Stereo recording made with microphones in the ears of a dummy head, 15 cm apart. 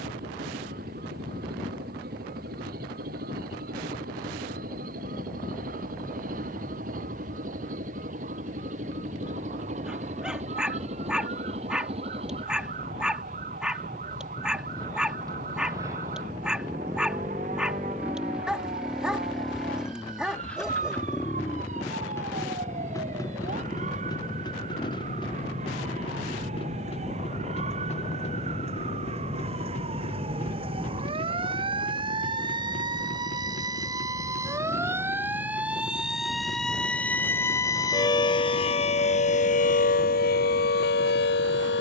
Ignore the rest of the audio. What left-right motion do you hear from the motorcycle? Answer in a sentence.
You can hear the motorcycle move to the left.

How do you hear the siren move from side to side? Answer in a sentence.
In this clip you hear the siren move to the left.